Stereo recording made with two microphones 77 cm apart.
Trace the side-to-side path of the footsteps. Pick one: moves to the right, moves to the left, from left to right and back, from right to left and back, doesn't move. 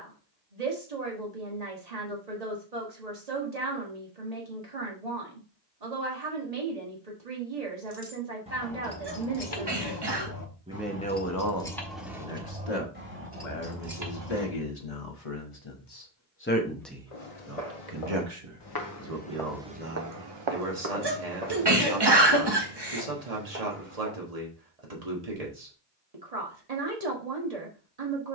moves to the right.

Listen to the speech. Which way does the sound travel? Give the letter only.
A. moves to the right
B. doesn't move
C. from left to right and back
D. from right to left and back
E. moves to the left
D.